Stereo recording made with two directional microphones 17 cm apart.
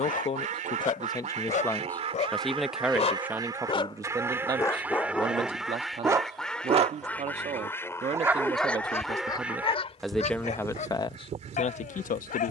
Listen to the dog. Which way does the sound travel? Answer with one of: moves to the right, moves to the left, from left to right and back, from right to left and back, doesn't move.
from left to right and back.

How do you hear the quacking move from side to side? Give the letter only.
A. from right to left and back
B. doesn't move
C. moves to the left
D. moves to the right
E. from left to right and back
A.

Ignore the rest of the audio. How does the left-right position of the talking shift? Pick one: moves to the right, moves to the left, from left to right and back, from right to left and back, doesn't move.
from left to right and back.